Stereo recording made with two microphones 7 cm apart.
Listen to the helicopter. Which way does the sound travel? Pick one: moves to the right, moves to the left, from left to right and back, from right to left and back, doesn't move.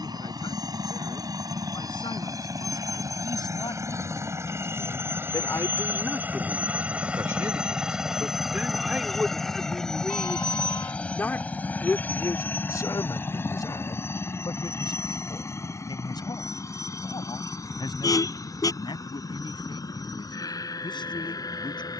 moves to the left.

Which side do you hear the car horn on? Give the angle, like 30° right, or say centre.
50° left.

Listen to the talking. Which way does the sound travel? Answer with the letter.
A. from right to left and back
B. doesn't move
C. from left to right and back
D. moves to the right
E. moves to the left
C.